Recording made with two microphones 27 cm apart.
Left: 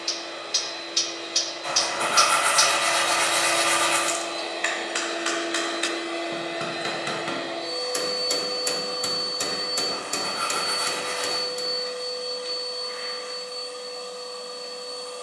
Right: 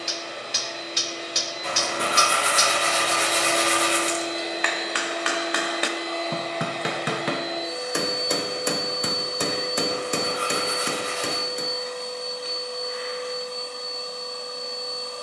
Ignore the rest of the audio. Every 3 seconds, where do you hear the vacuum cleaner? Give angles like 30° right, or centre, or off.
60° right, 10° right, centre, 40° right, 60° right.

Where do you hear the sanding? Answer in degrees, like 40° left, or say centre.
70° right.